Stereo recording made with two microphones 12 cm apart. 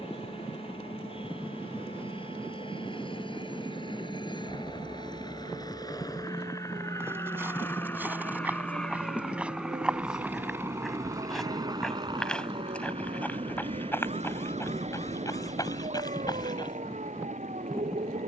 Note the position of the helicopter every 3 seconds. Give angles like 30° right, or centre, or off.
50° left, 40° left, 20° left, 20° right, 50° right, 70° right.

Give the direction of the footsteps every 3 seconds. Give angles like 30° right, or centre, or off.
off, off, 20° right, centre, 20° left, 30° left.